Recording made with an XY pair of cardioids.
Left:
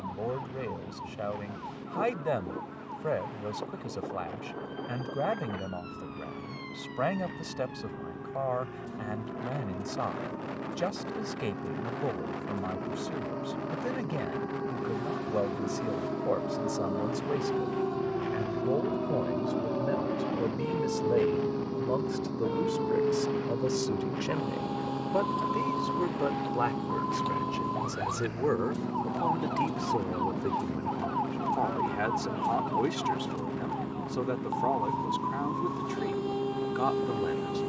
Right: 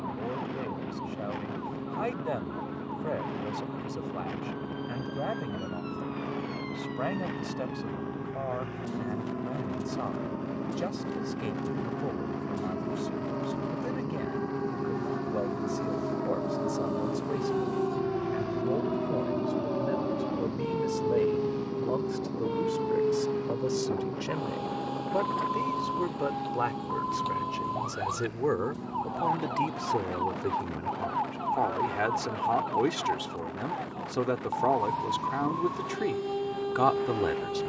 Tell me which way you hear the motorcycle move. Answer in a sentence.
You can hear the motorcycle go from the right side to the left.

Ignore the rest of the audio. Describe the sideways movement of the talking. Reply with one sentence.
In this clip you hear the talking move to the right.